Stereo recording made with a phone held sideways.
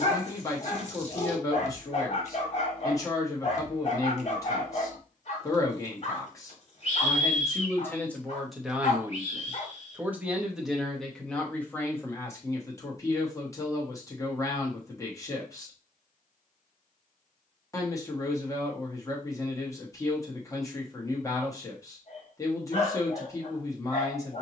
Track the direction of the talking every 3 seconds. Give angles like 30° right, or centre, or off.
20° left, 20° left, 10° left, centre, 20° left, 20° left, 20° left, 20° left.